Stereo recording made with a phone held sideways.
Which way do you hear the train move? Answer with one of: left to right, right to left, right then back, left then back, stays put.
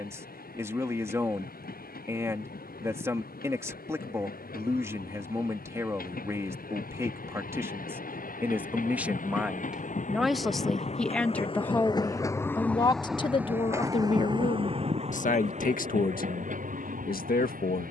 left to right.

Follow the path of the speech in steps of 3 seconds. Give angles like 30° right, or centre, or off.
20° right, 20° right, 20° right, centre, 40° left, 70° left.